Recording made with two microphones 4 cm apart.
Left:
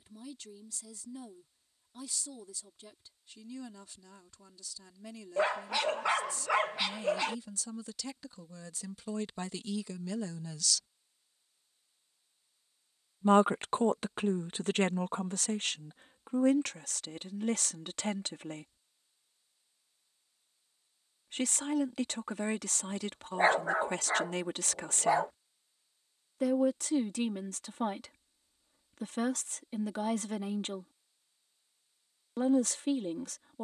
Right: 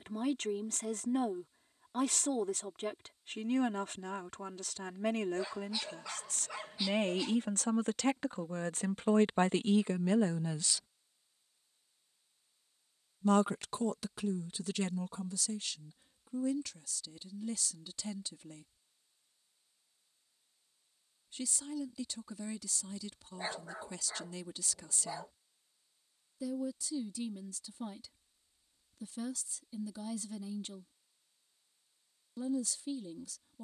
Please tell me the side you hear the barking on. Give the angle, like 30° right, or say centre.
70° left.